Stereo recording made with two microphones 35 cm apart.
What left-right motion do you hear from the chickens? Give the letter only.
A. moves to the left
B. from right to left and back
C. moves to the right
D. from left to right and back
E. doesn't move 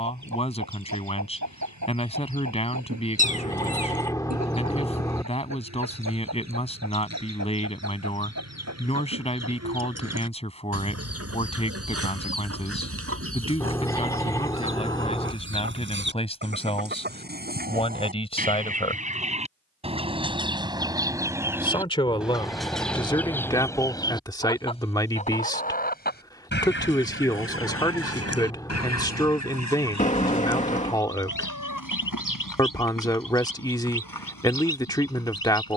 A.